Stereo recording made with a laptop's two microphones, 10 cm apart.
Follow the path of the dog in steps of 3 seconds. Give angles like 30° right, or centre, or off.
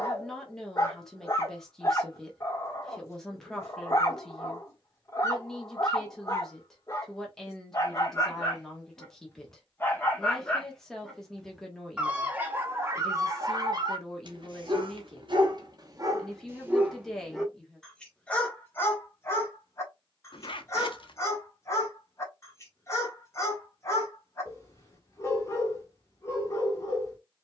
30° left, 30° left, 30° left, 10° left, 40° right, 30° right, 20° left, 30° left, 30° left.